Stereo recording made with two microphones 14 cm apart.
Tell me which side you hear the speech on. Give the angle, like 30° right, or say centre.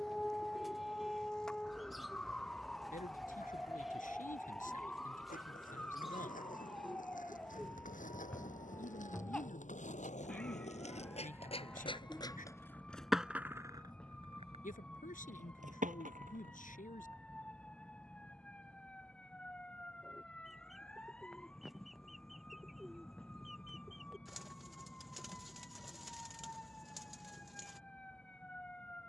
70° left.